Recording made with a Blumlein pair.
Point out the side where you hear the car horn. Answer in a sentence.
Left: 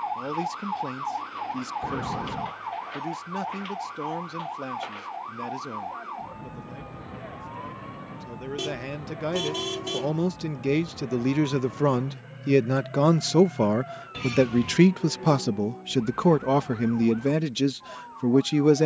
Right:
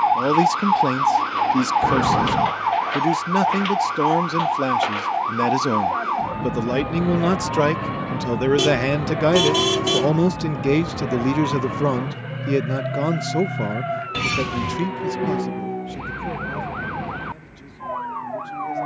In this clip you hear the car horn on the right.